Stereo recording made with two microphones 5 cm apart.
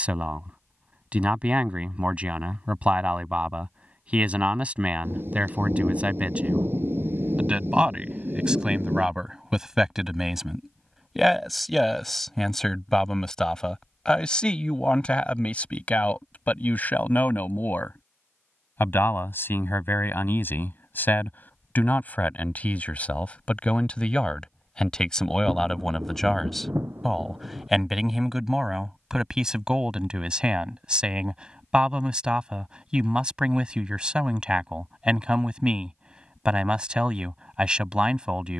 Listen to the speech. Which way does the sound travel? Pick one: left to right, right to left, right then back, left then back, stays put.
left then back.